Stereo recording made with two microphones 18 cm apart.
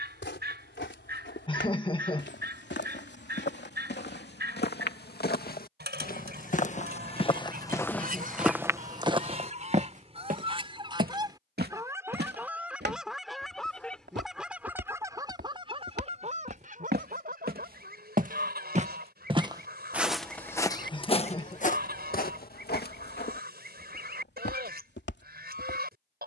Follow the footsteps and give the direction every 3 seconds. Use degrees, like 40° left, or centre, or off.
80° left, 70° left, 20° left, 40° right, 70° right, 60° right, 10° right, 50° left, 70° left.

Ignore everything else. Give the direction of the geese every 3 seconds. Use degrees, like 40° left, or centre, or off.
60° right, 60° right, 50° right, 30° right, centre, 40° right, 60° right, 60° right, 60° right.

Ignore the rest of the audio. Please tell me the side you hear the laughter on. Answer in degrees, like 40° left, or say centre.
30° left.